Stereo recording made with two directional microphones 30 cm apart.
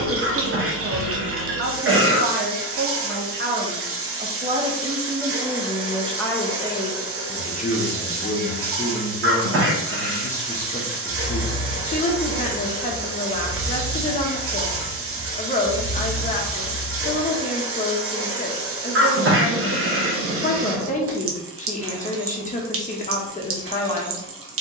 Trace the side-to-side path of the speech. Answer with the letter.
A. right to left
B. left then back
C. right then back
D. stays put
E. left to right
A.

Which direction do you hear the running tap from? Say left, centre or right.
right.